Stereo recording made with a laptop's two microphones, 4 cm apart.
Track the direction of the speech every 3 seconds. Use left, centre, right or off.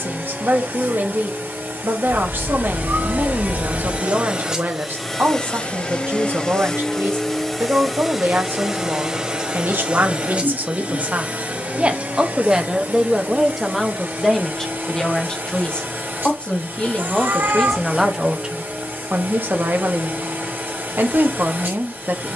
right, right, right, right, centre, left, right, right.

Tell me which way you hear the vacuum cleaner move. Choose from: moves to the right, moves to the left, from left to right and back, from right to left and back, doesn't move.
from right to left and back.